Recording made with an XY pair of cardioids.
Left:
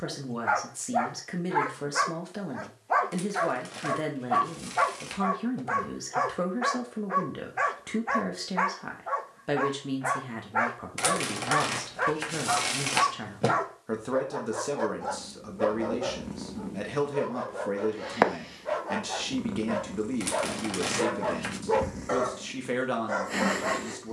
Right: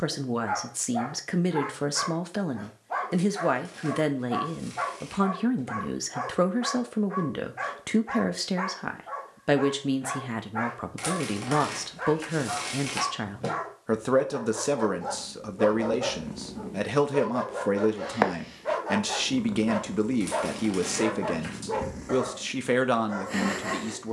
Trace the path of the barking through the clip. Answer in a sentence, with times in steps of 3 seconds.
You can hear the barking on the left from 0 s, on the right from 15 s and on the left from 21 s.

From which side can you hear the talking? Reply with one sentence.
You can hear the talking on the right.